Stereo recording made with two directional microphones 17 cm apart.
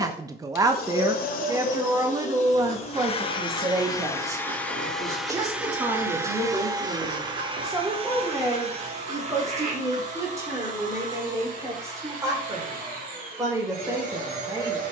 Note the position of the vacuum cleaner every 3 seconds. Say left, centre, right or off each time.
left, centre, right, right, right.